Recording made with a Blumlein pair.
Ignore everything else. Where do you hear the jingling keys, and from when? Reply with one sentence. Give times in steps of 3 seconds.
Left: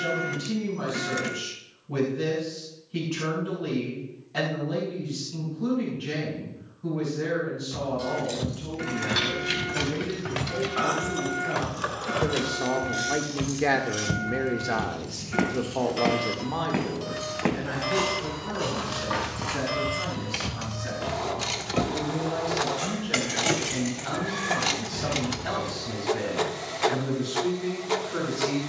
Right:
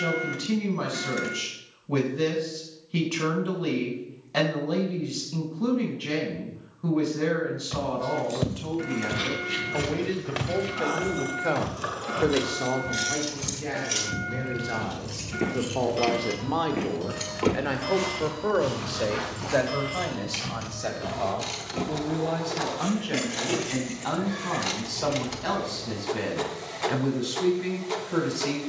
In this clip you hear the jingling keys not at all from 0 s, on the left from 6 s, on the right from 12 s, in the centre from 18 s, on the left from 21 s and not at all from 27 s.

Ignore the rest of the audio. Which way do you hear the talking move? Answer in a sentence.
In this clip you hear the talking go left and come back.